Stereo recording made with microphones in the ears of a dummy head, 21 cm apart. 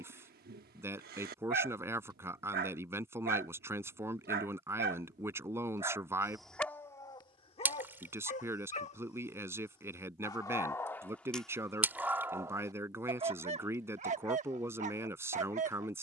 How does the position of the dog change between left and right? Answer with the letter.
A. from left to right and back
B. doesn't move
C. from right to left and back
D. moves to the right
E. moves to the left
C.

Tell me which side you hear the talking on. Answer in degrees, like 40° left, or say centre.
10° right.